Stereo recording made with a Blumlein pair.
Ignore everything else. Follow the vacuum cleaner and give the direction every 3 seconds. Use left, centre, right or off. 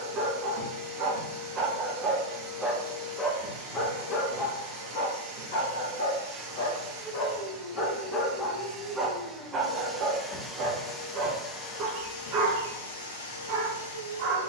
right, right, right, centre, left.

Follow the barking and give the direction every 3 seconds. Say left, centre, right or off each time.
right, left, left, right, right.